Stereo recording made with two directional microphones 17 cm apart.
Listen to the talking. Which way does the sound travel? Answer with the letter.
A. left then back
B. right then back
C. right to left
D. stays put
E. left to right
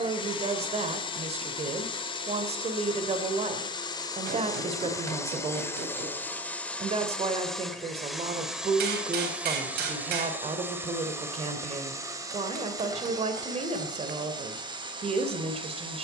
D.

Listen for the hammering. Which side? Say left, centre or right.
right.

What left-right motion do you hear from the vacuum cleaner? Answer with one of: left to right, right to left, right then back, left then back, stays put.
left to right.